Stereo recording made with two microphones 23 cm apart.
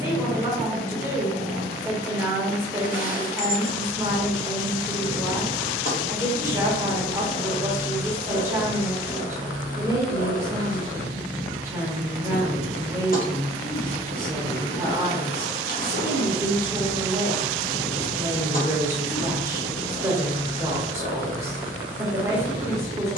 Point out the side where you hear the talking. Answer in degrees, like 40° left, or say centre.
10° right.